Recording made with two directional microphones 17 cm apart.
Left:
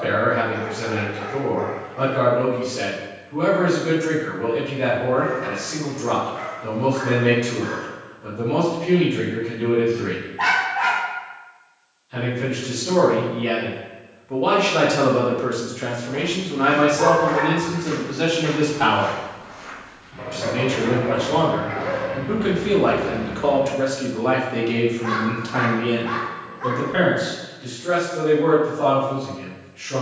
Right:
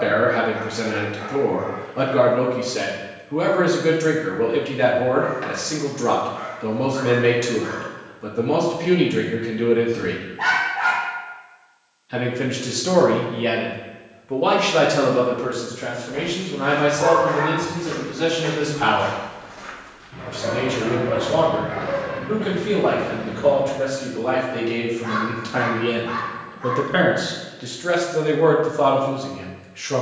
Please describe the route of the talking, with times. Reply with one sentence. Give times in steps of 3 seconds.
In this clip you hear the talking on the right from 0 s, on the left from 15 s, in the centre from 24 s and on the right from 27 s.